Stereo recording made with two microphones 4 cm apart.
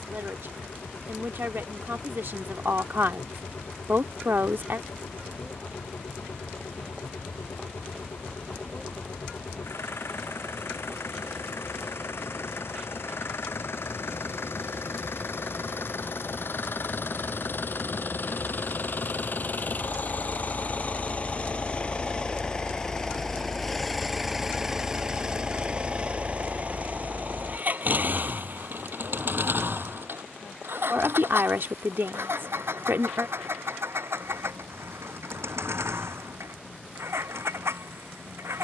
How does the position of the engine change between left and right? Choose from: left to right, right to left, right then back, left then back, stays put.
left to right.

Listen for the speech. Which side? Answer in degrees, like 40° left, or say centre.
60° right.